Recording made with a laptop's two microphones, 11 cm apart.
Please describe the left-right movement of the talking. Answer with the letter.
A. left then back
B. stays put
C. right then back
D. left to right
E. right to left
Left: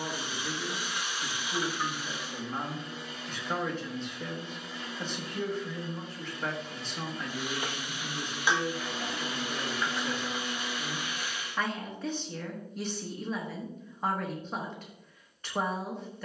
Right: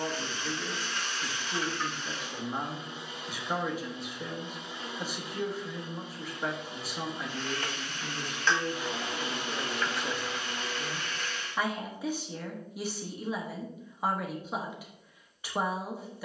B.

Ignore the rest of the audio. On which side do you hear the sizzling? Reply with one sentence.
You can hear the sizzling in the centre.